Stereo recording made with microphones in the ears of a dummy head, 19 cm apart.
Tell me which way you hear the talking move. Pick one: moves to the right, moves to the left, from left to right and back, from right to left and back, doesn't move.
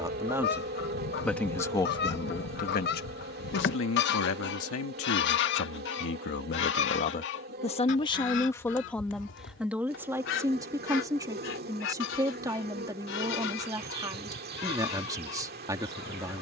from right to left and back.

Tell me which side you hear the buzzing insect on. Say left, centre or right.
right.